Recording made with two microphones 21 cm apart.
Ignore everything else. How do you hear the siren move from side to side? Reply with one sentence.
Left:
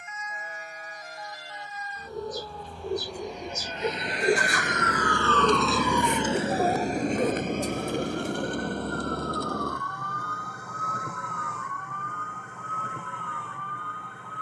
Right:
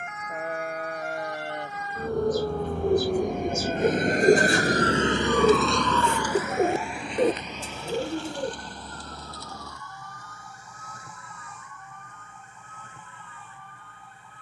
In this clip you hear the siren go from the right side to the left.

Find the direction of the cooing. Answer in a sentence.
You can hear the cooing on the right.